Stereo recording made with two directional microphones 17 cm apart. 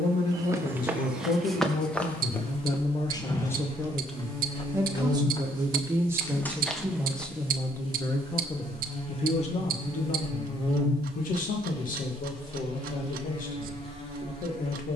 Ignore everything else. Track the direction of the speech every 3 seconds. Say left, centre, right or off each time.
left, centre, centre, left, left.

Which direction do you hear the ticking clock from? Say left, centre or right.
right.